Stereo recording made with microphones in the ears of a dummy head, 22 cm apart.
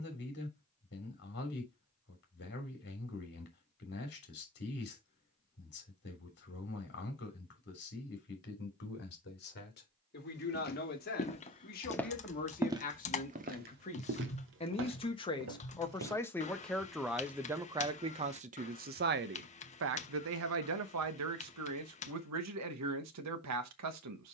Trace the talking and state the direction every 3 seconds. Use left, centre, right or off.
left, left, left, left, left, centre, right, right.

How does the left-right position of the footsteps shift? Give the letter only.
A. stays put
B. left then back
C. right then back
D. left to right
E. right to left
D.